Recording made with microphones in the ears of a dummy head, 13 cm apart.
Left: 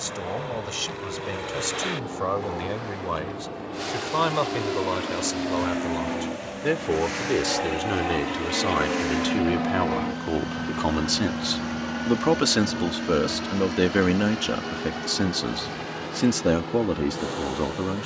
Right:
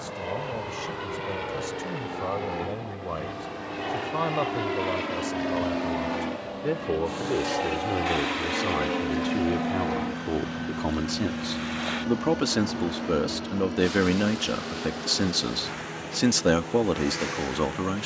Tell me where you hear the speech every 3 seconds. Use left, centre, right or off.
left, left, left, left, centre, right.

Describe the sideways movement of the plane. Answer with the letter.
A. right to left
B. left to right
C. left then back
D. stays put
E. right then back
A.